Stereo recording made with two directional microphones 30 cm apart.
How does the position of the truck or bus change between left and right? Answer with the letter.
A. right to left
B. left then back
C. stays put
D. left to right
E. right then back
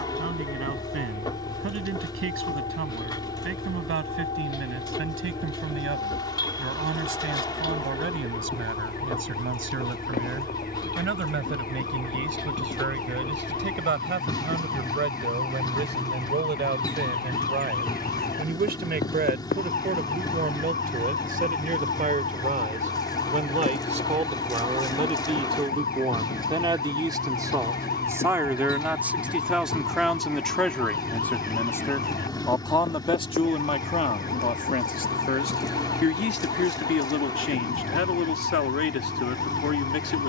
C.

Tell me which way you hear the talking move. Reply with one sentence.
In this clip you hear the talking go from the right side to the left.